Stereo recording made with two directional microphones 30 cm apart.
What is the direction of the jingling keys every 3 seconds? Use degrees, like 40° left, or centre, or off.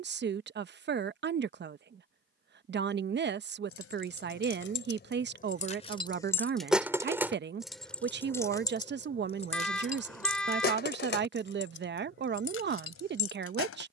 off, 40° left, centre, 30° left, 50° left.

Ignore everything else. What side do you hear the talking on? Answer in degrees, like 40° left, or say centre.
40° right.